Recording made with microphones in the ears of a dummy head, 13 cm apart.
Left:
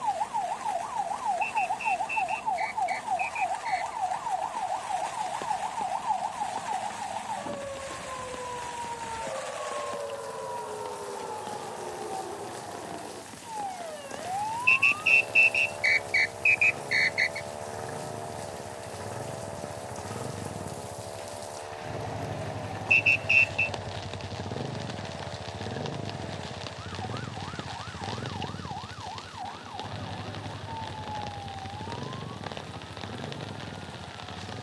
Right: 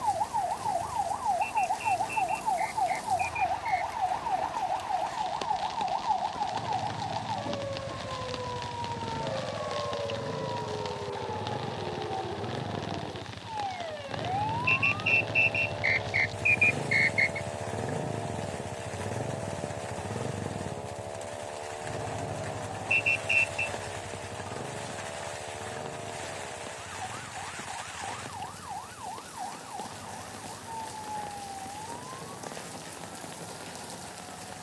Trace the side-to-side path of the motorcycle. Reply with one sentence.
In this clip you hear the motorcycle move from right to left.